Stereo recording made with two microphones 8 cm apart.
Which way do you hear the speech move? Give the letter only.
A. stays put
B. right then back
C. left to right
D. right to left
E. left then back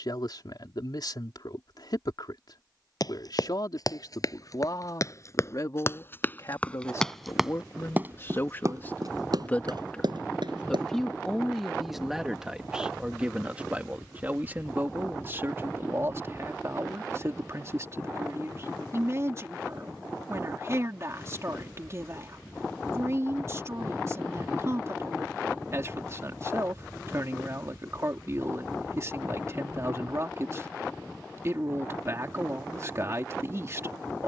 C.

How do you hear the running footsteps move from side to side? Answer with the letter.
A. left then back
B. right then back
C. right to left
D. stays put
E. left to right
E.